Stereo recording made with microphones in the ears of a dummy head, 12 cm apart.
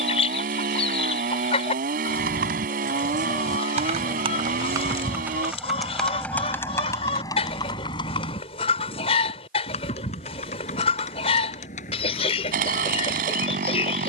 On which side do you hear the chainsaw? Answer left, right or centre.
right.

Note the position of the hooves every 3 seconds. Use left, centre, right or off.
right, right, left, left, left.